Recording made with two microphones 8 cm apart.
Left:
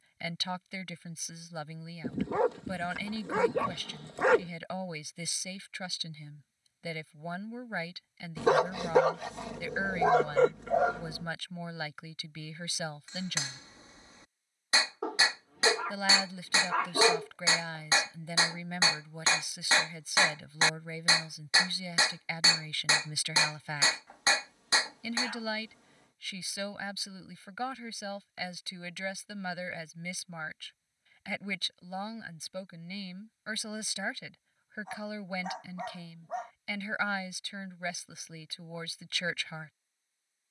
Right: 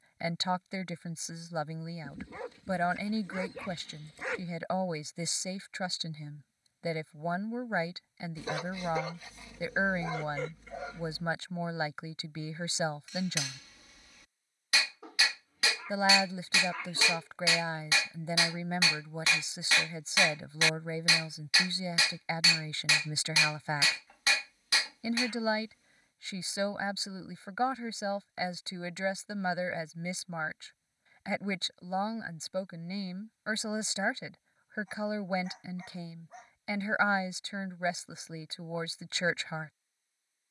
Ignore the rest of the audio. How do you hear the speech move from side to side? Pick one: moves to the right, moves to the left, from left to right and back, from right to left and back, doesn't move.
doesn't move.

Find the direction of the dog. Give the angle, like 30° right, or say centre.
70° left.